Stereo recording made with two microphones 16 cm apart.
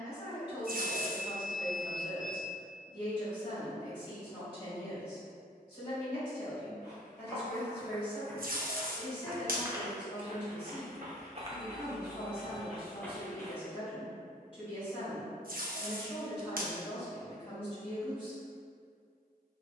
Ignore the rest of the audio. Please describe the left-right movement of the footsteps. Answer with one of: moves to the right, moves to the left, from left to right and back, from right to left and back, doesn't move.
from left to right and back.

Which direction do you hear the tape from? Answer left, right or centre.
right.